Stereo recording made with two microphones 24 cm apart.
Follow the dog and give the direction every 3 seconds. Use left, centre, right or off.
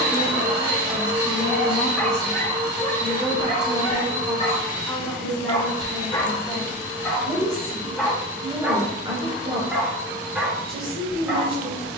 centre, left, centre, centre.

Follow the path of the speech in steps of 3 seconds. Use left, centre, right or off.
left, centre, centre, right.